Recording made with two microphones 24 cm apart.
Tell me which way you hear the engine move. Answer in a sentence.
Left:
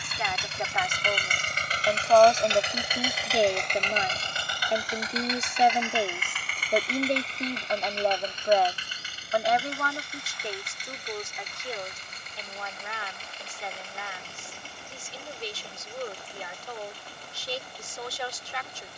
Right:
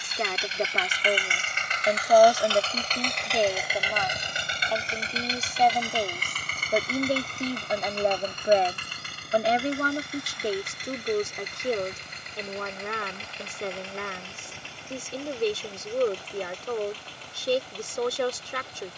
You can hear the engine go from the left side to the right.